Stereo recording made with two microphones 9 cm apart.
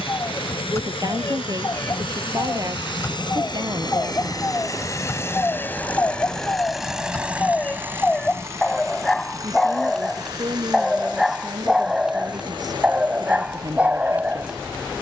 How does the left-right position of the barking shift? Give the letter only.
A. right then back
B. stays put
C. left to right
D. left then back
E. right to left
C.